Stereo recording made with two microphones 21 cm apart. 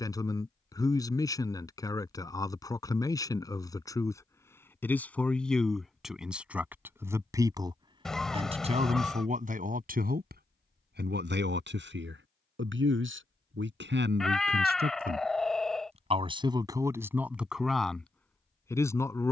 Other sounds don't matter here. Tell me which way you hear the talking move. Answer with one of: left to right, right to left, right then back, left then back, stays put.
right then back.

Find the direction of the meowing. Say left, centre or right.
centre.